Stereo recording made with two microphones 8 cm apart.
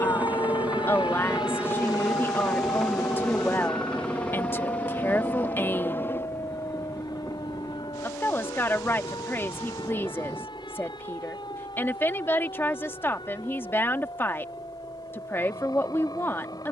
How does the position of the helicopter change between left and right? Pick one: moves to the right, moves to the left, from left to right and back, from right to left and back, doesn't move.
moves to the left.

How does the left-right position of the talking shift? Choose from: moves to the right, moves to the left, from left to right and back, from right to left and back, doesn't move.
doesn't move.